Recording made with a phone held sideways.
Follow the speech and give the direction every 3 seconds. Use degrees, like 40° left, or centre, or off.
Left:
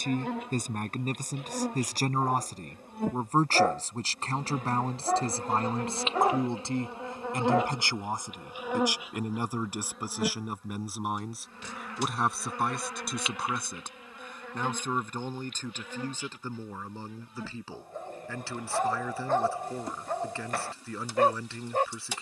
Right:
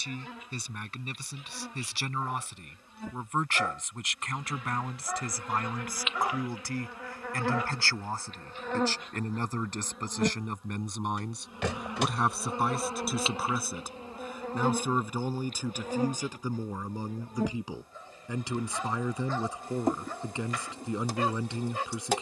40° left, 30° left, 20° left, 10° left, centre, 10° right, 20° right, 20° right.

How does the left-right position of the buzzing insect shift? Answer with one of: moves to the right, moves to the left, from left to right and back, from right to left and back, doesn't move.
moves to the right.